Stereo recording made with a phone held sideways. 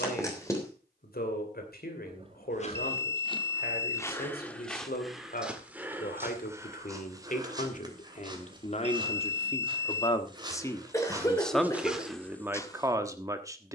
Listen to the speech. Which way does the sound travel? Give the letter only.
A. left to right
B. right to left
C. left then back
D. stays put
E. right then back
A.